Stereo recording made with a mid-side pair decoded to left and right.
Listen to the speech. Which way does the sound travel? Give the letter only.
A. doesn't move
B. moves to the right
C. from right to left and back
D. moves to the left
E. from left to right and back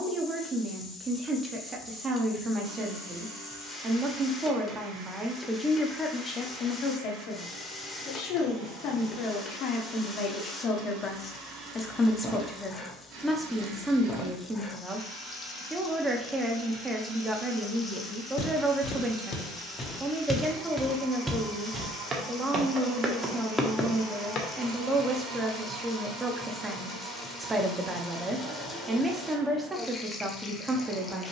C.